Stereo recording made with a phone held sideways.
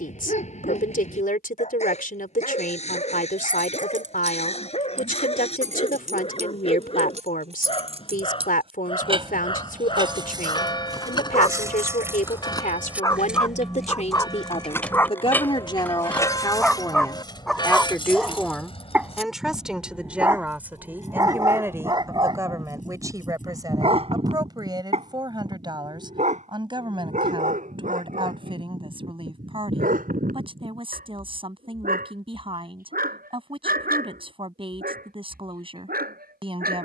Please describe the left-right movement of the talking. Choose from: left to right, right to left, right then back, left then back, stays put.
left to right.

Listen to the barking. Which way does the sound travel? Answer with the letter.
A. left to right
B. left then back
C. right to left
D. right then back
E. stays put
A.